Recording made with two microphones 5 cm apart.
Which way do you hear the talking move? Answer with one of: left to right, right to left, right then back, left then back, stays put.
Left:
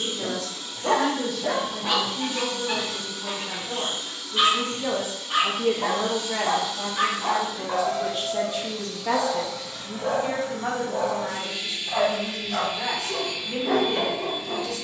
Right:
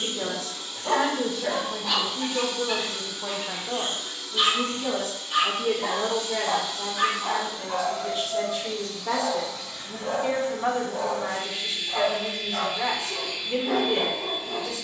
left then back.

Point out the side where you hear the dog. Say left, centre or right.
left.